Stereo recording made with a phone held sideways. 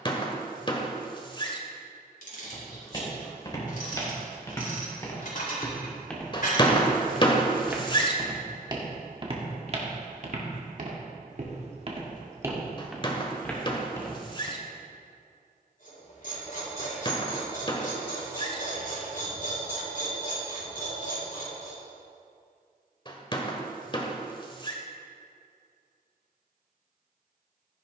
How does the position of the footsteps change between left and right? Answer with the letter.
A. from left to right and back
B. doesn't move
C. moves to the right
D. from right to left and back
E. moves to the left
A.